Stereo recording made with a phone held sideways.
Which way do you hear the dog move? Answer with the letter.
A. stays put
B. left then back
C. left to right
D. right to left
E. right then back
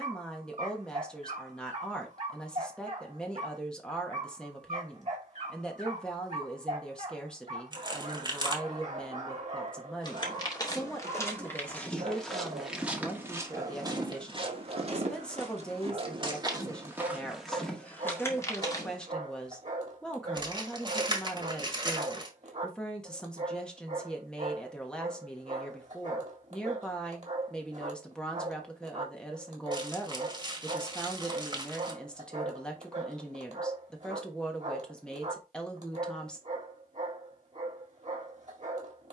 A.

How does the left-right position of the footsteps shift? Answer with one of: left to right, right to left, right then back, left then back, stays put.
right then back.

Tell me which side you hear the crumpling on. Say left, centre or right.
right.